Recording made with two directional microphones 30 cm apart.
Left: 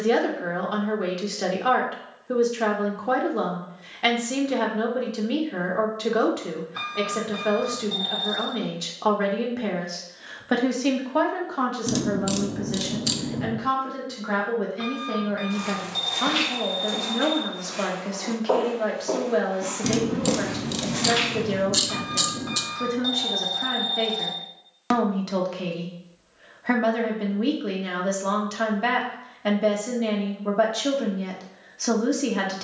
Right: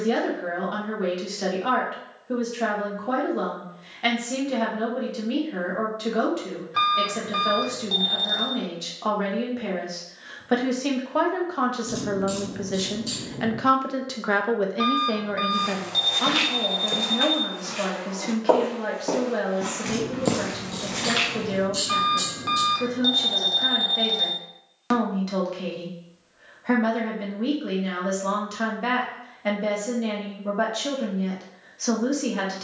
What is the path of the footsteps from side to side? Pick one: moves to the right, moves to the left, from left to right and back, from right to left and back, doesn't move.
from left to right and back.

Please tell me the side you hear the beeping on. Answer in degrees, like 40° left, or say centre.
40° right.